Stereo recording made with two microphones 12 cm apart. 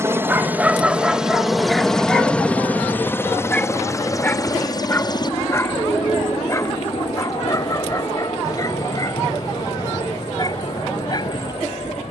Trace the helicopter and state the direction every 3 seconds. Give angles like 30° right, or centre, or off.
centre, 30° left, 40° left, 50° left.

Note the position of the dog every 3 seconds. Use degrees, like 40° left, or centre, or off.
centre, 20° left, 30° left, 30° left.